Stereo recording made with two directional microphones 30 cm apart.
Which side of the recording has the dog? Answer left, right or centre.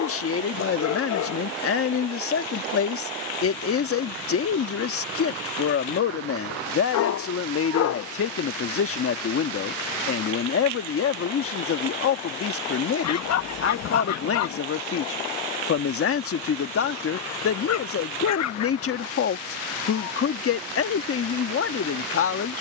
left.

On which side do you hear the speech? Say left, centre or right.
left.